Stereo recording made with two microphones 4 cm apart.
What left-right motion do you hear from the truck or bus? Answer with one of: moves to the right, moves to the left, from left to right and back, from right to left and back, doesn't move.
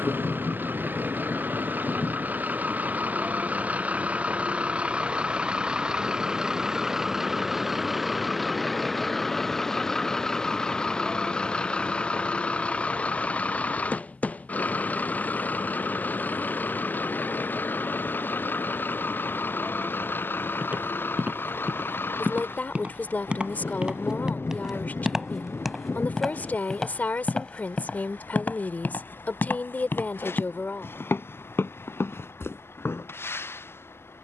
moves to the left.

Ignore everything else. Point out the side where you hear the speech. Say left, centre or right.
left.